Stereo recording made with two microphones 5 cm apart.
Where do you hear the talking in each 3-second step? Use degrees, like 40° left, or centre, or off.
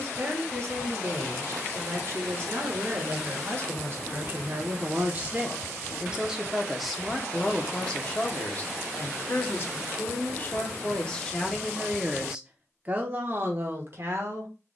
60° right, 40° right, 10° left, 30° left, 40° right.